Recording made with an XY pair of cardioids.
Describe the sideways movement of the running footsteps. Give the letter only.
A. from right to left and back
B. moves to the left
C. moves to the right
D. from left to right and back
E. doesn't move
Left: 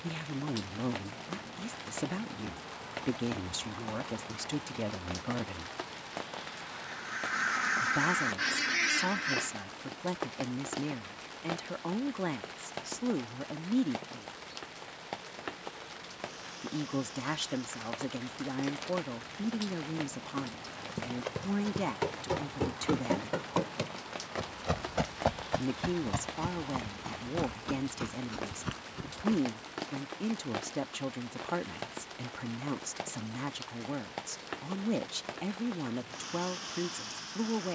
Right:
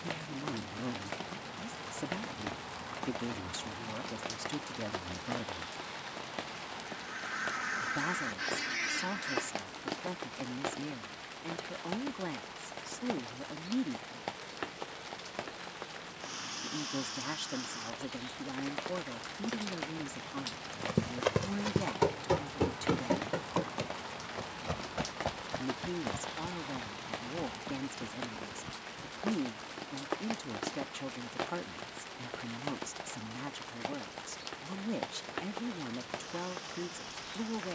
B.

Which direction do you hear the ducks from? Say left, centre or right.
left.